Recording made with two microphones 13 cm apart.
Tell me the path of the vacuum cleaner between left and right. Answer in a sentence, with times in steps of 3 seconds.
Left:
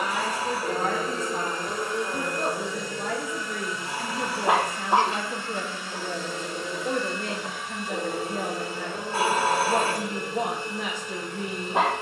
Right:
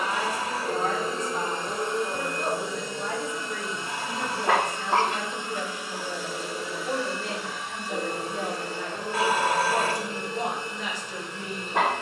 You can hear the vacuum cleaner on the right from 0 s and in the centre from 6 s.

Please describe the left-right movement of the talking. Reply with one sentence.
You can hear the talking stay put.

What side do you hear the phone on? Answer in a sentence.
In this clip you hear the phone on the left.